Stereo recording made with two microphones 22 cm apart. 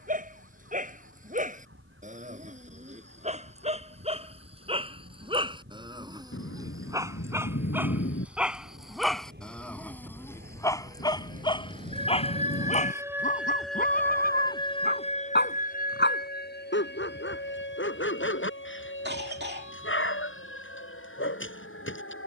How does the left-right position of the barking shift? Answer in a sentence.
In this clip you hear the barking move from right to left.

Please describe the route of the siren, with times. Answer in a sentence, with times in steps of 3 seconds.
You can hear the siren on the right from 0 s, in the centre from 12 s and on the left from 15 s.